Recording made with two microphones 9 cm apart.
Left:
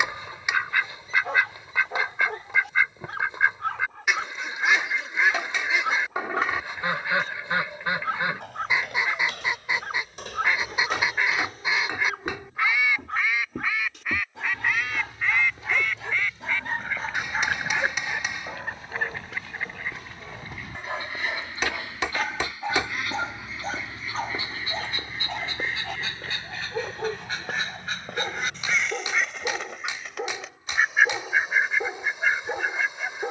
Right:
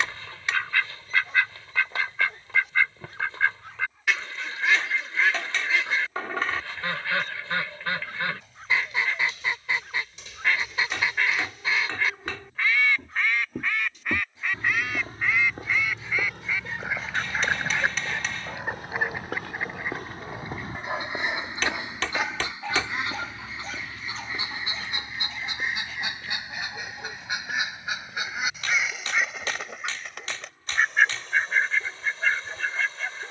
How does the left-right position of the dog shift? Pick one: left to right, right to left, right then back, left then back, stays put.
right then back.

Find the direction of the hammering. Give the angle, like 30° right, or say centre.
20° left.